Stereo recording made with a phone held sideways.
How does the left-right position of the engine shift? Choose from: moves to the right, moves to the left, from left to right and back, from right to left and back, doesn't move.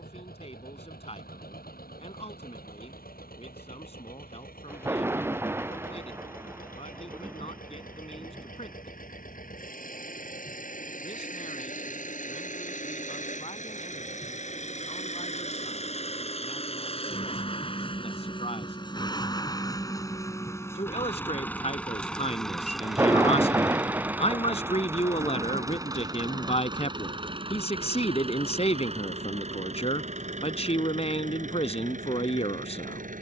moves to the right.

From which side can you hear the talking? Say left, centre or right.
left.